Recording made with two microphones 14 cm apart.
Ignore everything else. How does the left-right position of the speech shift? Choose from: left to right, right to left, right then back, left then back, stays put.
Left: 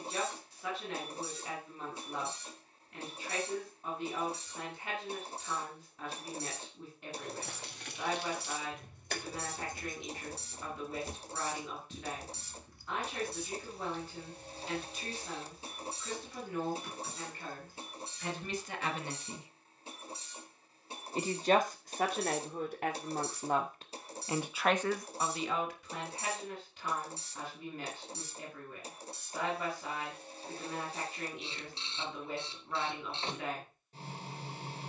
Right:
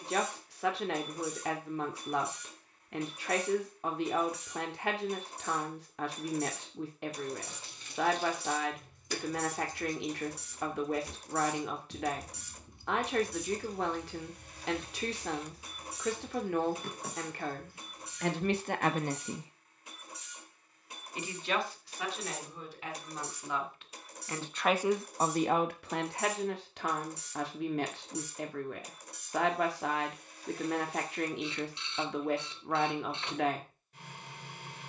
left then back.